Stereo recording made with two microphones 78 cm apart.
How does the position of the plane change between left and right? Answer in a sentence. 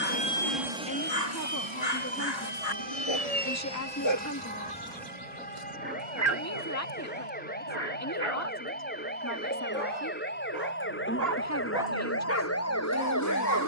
In this clip you hear the plane move from left to right.